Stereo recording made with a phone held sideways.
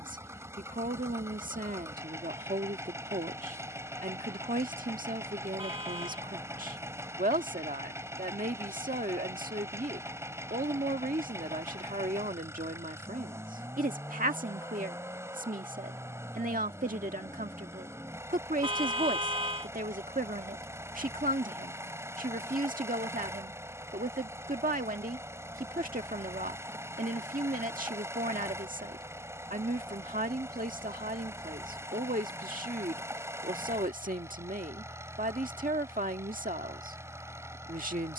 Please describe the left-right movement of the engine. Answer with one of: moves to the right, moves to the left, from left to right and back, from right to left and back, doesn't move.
doesn't move.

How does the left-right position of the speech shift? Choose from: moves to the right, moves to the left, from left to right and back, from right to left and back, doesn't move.
doesn't move.